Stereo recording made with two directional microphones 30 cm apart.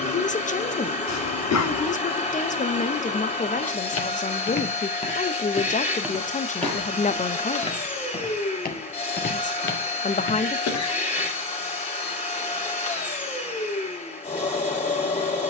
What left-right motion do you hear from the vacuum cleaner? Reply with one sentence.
You can hear the vacuum cleaner stay in one place.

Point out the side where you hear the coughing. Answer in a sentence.
You can hear the coughing on the left.